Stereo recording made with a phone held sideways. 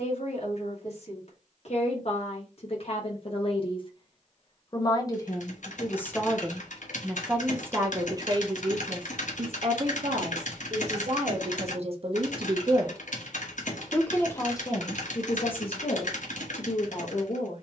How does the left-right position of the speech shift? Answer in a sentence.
In this clip you hear the speech go right and come back.